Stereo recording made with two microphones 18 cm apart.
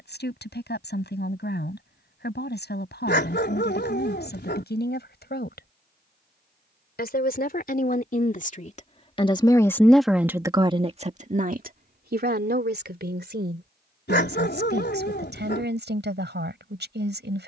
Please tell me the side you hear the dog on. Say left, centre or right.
left.